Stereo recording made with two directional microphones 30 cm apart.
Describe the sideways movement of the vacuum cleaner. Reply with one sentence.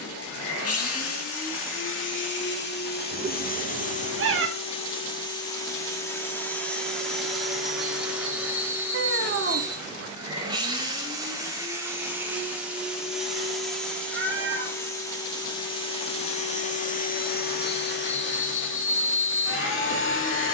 You can hear the vacuum cleaner go right and come back.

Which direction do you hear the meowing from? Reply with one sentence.
In this clip you hear the meowing on the right.